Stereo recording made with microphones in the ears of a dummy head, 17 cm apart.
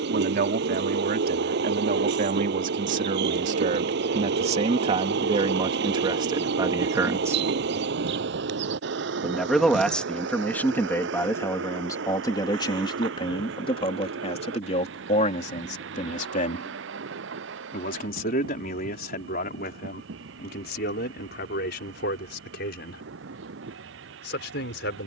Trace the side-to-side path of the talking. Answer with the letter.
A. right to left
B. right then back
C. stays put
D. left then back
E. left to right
A.